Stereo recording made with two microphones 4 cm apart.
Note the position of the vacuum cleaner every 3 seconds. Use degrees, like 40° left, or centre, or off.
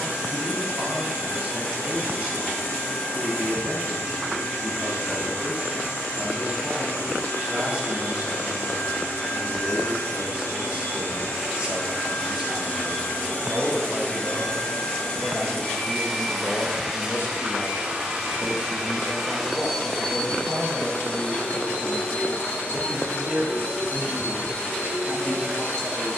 70° left, 70° left, 70° left, 60° left, 40° left, centre, centre, 50° left, 70° left.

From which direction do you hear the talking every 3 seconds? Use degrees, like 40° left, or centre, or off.
30° right, 30° right, 30° right, 30° right, centre, 50° left, 40° left, 10° right, 30° right.